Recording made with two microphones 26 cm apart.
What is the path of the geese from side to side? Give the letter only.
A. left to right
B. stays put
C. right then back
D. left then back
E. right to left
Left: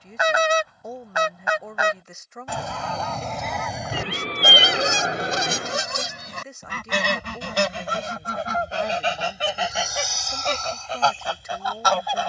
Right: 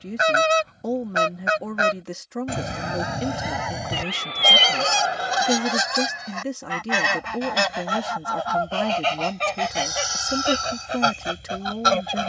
D.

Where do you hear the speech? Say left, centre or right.
right.